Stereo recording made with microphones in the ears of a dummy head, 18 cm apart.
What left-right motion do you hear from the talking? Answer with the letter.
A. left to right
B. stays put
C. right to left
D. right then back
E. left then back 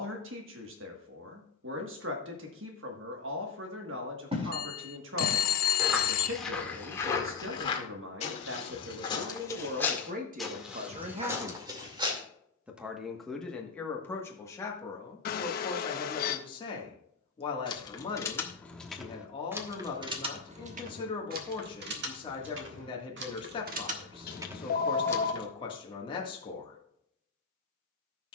C.